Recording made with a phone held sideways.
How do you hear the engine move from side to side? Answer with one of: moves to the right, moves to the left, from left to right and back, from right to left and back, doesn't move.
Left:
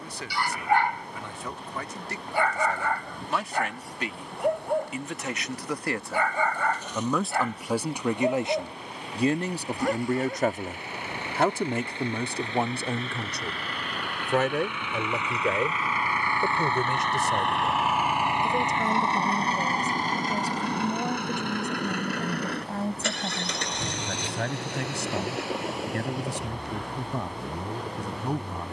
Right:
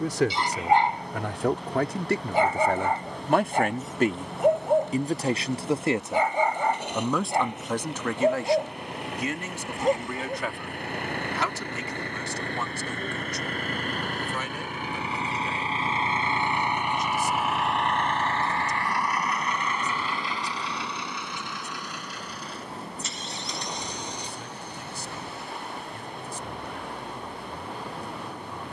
moves to the left.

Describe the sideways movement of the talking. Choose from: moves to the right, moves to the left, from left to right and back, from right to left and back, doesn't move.
moves to the left.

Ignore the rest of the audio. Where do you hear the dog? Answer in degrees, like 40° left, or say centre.
20° right.